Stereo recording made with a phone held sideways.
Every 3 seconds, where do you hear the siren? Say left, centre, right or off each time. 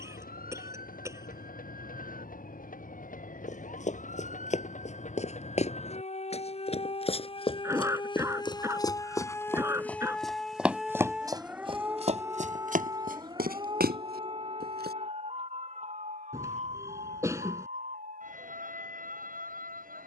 left, left, left, centre, right, right, right.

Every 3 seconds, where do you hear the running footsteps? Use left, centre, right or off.
off, left, left, centre, right, off, off.